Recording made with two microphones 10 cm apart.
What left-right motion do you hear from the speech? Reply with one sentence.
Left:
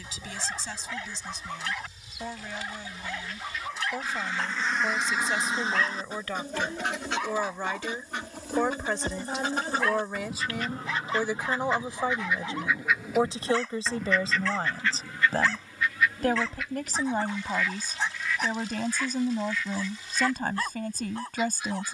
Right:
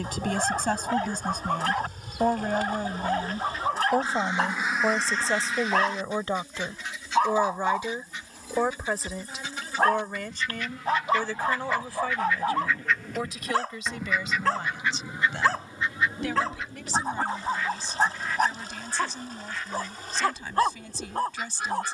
In this clip you hear the speech travel towards the left.